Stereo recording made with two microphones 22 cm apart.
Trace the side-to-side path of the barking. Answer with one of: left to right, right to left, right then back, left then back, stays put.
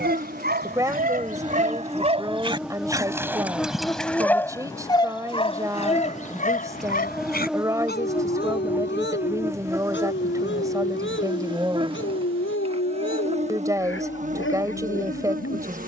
right to left.